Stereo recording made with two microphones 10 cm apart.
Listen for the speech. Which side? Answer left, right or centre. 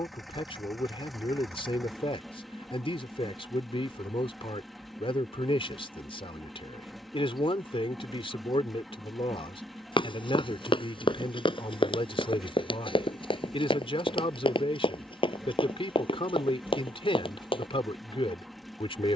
left.